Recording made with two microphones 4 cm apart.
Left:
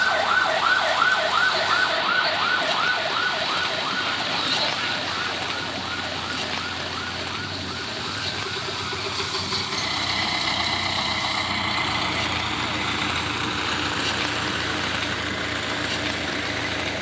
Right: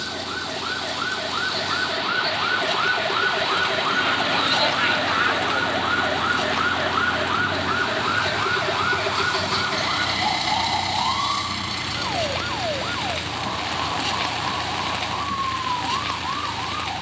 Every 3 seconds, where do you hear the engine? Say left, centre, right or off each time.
right, right, right, centre, left, left.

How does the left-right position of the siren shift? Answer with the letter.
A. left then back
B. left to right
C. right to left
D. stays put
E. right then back
B.